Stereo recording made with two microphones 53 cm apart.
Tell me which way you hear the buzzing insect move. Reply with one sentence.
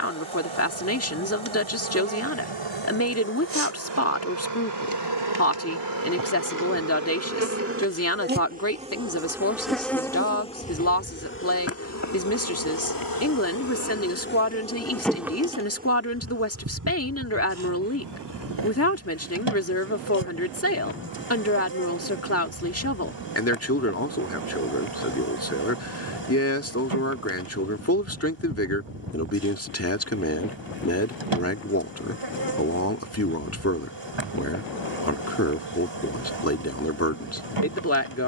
In this clip you hear the buzzing insect go left and come back.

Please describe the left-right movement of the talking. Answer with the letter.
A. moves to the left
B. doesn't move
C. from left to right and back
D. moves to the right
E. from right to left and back
B.